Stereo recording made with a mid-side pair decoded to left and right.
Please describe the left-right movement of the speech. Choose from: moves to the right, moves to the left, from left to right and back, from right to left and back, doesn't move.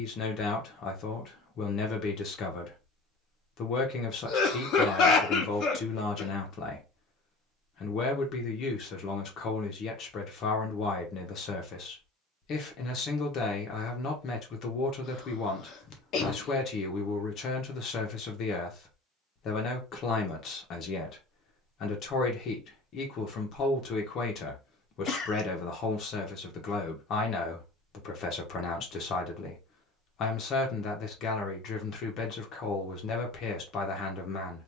doesn't move.